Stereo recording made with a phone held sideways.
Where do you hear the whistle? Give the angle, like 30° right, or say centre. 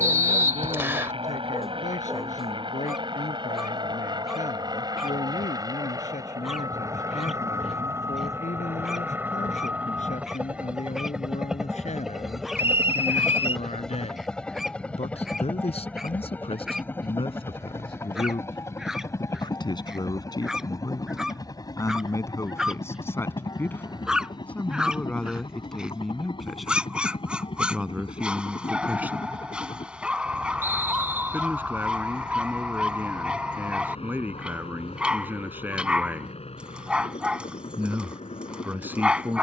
20° right.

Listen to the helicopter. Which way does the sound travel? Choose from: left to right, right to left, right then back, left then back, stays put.
right to left.